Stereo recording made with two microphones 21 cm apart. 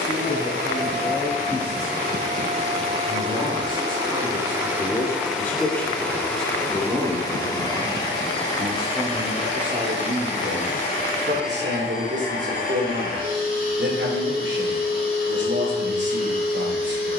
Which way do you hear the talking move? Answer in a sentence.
You can hear the talking move from left to right.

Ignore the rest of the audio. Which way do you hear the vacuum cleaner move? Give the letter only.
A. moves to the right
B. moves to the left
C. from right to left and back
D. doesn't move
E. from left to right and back
B.